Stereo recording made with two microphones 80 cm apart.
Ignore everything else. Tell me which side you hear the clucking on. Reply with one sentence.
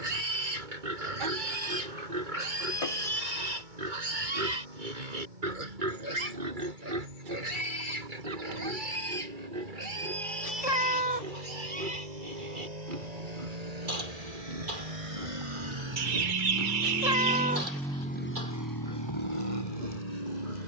In this clip you hear the clucking on the right.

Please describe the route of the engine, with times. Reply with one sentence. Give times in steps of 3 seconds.
In this clip you hear the engine on the right from 0 s and on the left from 18 s.